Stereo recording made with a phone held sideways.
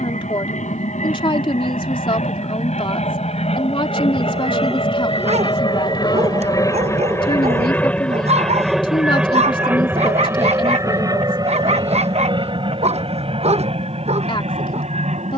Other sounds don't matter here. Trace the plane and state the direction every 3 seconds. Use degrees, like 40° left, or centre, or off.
60° left, 40° left, 10° left, 20° right, 40° right.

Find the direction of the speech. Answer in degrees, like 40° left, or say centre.
40° left.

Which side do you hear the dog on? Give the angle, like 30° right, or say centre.
50° right.